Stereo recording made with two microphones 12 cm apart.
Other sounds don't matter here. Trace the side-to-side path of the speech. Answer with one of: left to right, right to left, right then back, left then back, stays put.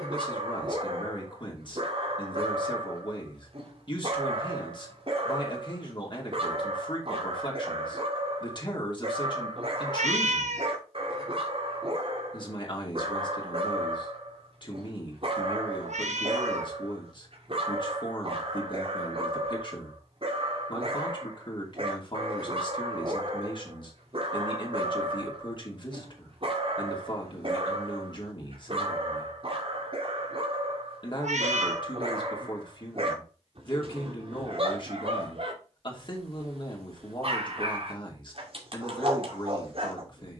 stays put.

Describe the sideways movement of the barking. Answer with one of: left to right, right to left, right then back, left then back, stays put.
stays put.